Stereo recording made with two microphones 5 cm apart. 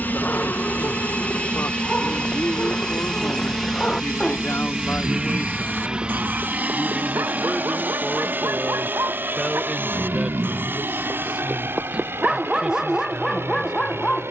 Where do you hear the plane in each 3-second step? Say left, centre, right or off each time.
left, centre, right, right, right.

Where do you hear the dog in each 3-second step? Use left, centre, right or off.
left, centre, right, right, centre.